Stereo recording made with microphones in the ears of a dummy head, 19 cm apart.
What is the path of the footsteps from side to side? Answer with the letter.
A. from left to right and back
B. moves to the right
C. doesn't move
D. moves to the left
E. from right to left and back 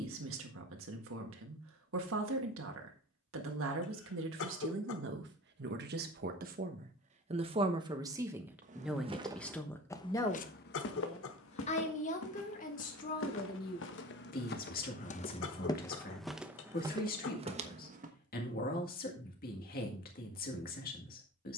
E.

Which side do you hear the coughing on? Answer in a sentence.
You can hear the coughing on the left.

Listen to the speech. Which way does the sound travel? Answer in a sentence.
In this clip you hear the speech move from right to left.